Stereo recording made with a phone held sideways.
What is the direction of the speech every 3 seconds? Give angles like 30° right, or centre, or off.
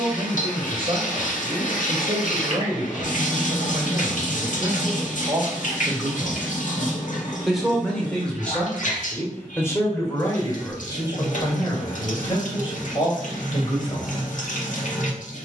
40° right, 30° right, centre, 30° left, 40° left.